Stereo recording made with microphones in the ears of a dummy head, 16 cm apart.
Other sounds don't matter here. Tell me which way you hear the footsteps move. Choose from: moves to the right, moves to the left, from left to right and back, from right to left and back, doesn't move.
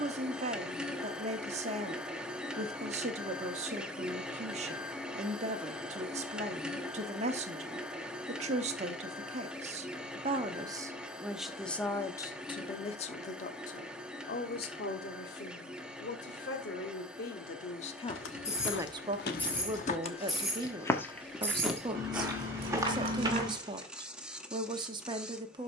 moves to the right.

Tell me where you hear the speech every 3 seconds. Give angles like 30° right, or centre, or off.
40° right, 40° right, 40° right, 20° right, 40° left, 60° left, 20° right, 20° right, 20° right.